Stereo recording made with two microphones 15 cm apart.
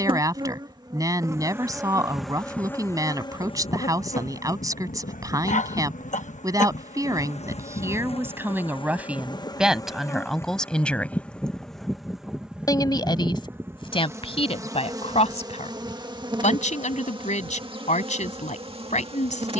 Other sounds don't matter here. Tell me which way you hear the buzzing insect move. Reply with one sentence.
You can hear the buzzing insect move from right to left and back again.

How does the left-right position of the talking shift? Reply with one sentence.
You can hear the talking move to the left.